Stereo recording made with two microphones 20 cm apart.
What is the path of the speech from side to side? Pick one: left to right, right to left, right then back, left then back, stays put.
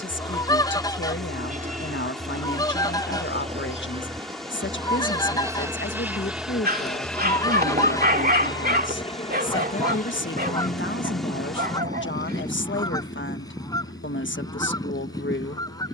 stays put.